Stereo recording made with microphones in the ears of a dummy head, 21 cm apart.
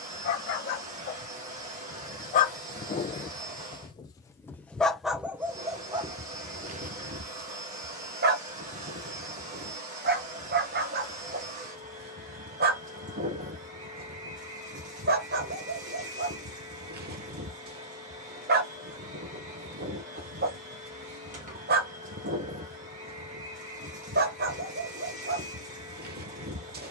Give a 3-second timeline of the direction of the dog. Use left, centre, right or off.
left, centre, right, right, right, right, right, right, right.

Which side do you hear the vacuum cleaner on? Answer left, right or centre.
right.